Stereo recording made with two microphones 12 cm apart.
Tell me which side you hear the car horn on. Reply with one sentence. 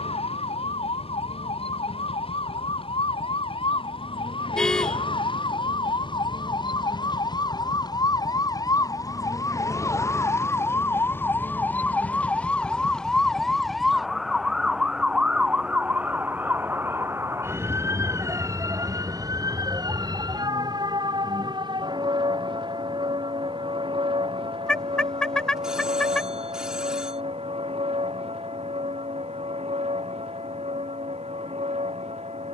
You can hear the car horn in the centre.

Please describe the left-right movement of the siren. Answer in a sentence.
You can hear the siren travel towards the right.